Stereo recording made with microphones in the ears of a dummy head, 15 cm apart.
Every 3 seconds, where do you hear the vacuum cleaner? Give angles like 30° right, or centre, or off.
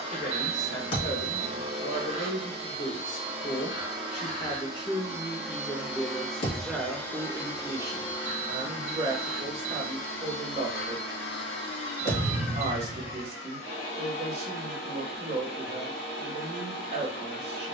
40° right, 20° right, 20° left, 60° left, 80° left, 80° left.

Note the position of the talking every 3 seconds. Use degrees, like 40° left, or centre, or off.
50° left, 30° left, 10° right, 40° right, 40° right, 40° right.